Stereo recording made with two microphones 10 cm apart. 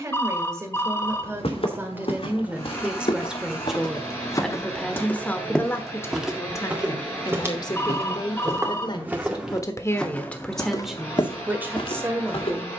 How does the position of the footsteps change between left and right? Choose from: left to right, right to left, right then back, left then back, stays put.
right then back.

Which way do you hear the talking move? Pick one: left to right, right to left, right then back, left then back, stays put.
left then back.